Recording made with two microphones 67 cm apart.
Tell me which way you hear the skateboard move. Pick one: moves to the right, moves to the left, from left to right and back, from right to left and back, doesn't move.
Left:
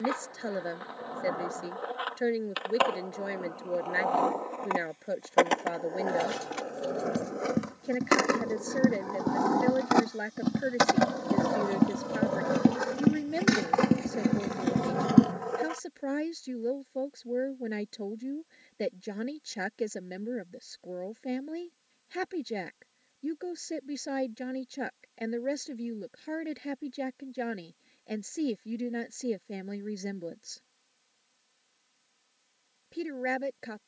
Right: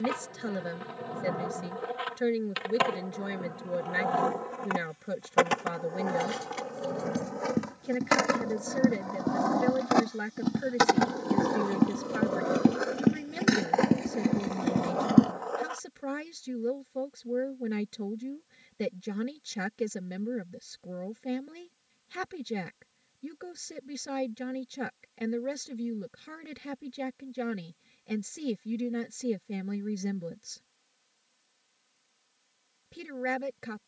moves to the left.